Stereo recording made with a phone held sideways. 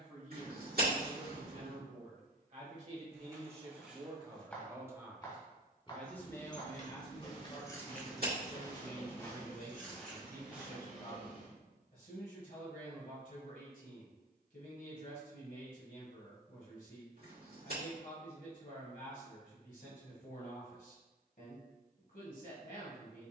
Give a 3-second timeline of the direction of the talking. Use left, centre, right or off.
right, right, left, left, left, left, left, left.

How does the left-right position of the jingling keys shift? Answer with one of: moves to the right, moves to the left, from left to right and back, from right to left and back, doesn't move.
moves to the right.